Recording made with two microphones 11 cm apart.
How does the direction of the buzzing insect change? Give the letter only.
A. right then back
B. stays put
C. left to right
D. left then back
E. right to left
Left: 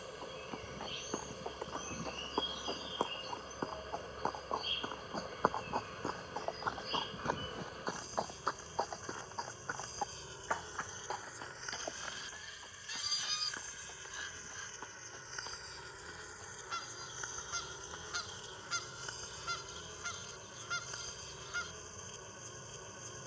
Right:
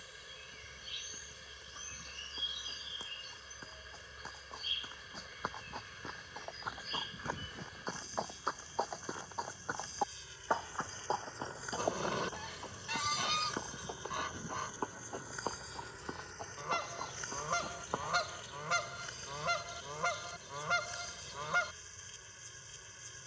A.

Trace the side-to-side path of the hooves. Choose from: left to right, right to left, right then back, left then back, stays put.
left to right.